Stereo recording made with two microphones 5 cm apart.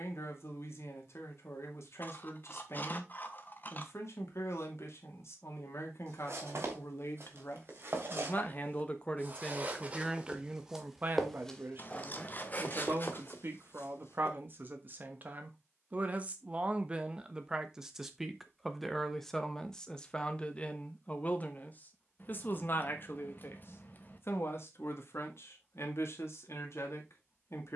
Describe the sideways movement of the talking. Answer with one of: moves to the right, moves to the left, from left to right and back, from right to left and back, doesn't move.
from left to right and back.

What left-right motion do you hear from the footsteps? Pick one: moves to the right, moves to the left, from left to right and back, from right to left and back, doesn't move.
moves to the left.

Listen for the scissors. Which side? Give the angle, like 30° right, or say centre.
40° left.